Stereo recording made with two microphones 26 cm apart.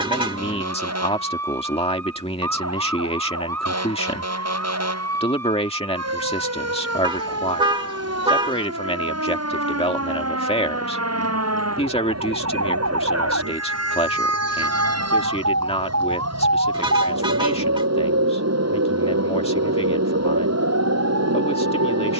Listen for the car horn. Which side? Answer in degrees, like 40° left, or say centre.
20° right.